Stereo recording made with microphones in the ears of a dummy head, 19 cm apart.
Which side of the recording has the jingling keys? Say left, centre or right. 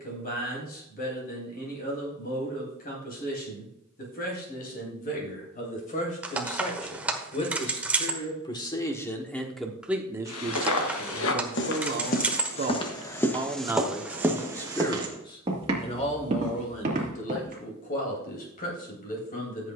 centre.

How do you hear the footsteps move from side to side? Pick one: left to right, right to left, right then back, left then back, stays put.
left to right.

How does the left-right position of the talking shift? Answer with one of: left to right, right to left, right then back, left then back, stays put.
right then back.